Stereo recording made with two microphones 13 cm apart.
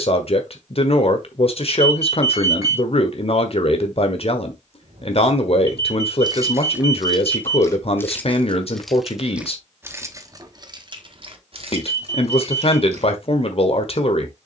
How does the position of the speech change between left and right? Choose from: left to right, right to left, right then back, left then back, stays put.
stays put.